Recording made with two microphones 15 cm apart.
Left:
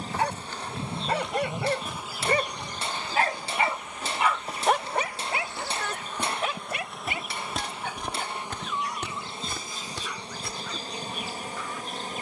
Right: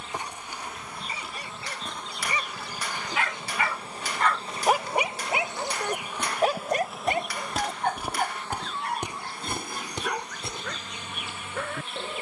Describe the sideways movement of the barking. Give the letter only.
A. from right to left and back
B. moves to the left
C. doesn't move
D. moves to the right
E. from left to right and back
D.